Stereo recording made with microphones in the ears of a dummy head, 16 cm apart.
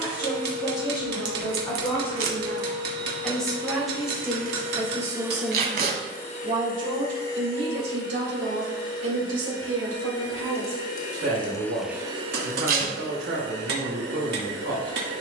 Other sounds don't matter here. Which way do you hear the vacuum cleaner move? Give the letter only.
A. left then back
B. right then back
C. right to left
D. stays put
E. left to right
A.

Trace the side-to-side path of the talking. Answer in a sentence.
In this clip you hear the talking travel towards the right.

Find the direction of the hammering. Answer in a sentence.
In this clip you hear the hammering on the right.